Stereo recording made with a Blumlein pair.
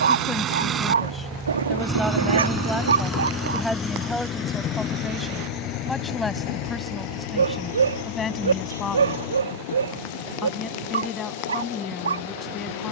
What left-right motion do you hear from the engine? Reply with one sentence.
In this clip you hear the engine move from right to left.